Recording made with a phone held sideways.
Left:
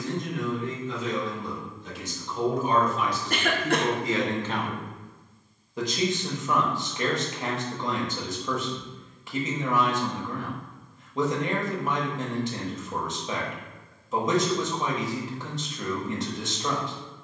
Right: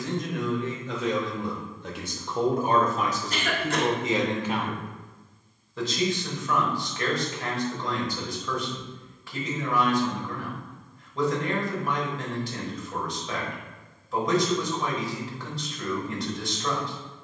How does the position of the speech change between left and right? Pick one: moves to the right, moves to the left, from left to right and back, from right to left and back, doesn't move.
moves to the left.